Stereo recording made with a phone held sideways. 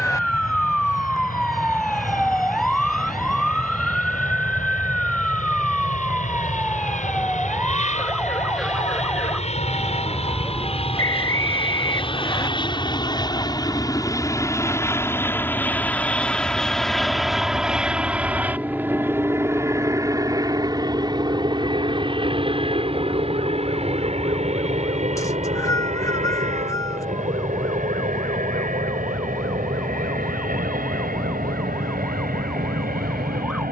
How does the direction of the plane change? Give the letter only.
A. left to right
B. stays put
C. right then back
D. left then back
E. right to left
A.